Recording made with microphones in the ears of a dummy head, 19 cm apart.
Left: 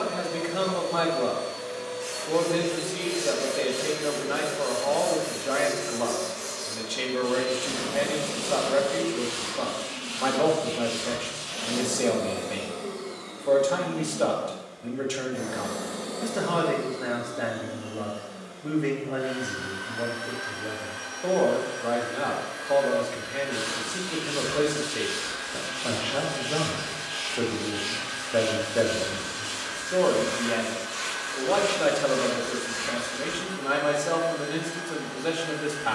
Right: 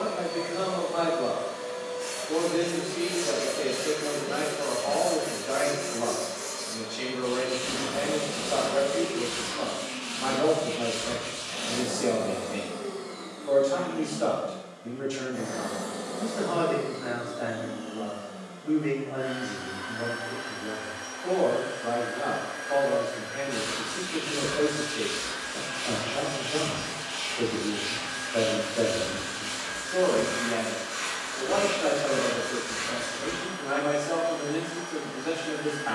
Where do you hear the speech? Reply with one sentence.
In this clip you hear the speech on the left.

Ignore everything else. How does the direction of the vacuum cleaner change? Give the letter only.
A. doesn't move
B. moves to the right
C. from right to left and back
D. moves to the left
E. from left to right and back
A.